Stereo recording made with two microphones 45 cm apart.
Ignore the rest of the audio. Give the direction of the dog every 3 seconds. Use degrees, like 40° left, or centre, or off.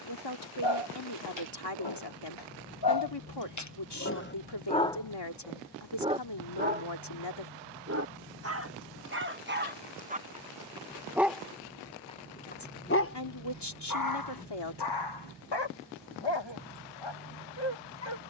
70° left, 20° left, 20° right, 10° right, 30° left, 70° left.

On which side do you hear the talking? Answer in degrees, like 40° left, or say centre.
60° left.